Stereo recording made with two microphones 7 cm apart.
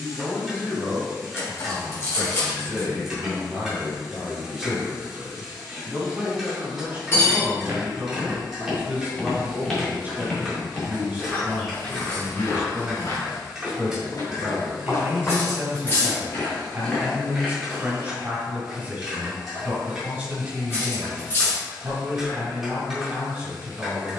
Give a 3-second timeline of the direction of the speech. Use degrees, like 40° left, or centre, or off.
20° left, centre, 20° right, 20° right, 20° right, 20° right, 20° right, 20° right.